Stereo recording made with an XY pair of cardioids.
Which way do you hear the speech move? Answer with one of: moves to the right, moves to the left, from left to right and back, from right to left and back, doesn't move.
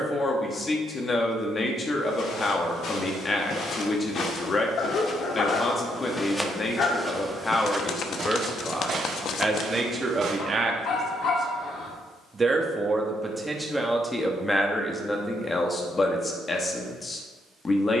from left to right and back.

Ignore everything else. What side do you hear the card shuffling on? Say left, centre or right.
left.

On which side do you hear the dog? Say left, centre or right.
left.